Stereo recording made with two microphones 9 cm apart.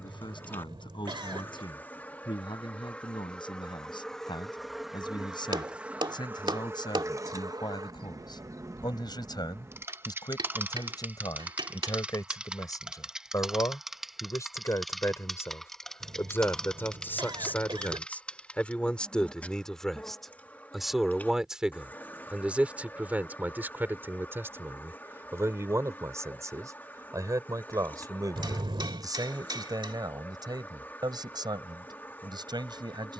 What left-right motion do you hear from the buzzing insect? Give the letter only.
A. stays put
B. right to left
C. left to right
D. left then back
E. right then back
E.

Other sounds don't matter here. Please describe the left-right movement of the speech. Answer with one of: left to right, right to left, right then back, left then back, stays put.
left to right.